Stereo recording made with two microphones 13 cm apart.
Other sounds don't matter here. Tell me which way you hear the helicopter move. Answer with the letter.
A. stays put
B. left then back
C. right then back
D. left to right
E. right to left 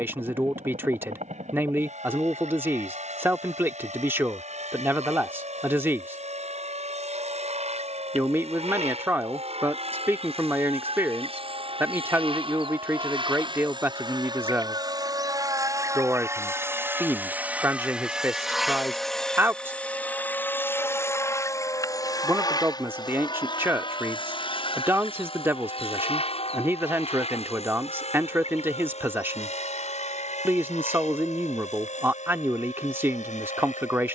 E.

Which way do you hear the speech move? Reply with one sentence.
You can hear the speech stay put.